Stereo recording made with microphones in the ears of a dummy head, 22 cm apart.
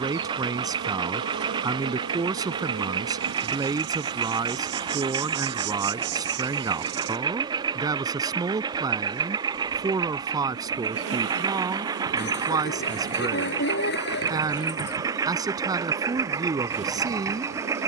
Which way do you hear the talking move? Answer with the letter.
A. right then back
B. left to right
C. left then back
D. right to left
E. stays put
E.